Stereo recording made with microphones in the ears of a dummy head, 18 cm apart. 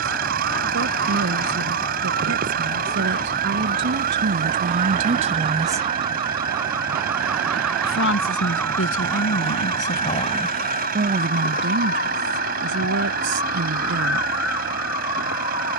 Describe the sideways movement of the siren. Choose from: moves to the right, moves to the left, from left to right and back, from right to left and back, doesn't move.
moves to the left.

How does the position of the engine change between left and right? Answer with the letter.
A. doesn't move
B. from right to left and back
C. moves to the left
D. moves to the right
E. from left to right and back
A.